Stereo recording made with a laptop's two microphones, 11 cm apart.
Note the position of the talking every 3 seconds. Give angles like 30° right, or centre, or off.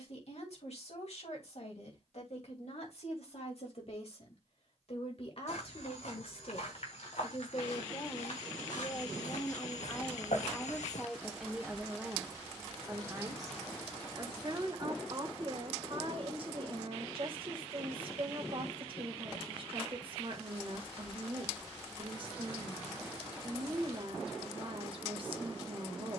70° left, 60° left, 40° left, 10° left, 30° right, 50° right, 50° right, 50° right, 50° right.